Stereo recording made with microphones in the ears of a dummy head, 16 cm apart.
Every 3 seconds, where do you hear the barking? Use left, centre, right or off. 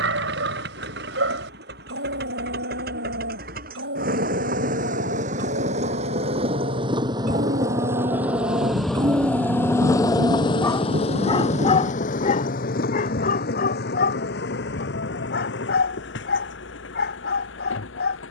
right, right, right, centre, left, left.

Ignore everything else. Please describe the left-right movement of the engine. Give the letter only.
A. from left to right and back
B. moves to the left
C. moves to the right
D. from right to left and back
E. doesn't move
B.